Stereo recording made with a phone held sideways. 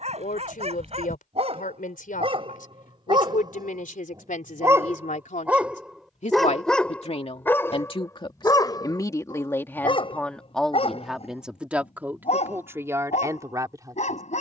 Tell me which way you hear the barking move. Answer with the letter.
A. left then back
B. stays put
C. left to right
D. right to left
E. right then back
D.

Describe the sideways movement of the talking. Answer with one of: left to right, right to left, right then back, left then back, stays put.
left to right.